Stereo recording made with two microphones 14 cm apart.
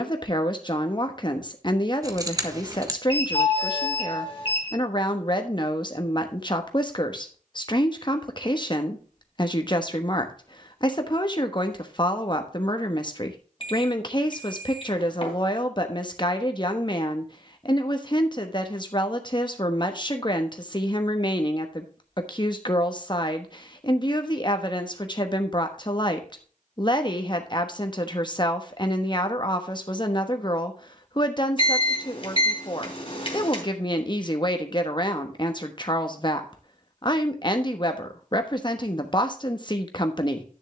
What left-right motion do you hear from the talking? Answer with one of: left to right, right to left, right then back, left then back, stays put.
stays put.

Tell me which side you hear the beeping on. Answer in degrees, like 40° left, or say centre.
40° left.